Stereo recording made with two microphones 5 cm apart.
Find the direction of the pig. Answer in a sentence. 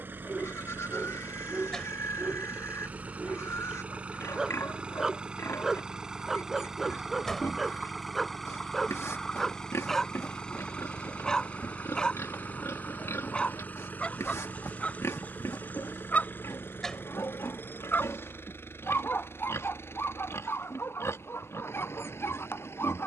In this clip you hear the pig on the left.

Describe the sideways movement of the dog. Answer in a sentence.
In this clip you hear the dog move to the left.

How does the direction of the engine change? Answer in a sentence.
You can hear the engine move from right to left.